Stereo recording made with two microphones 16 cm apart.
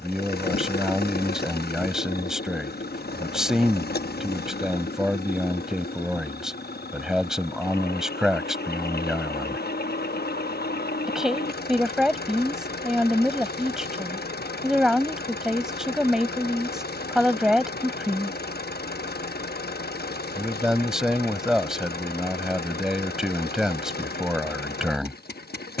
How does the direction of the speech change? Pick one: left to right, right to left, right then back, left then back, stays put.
stays put.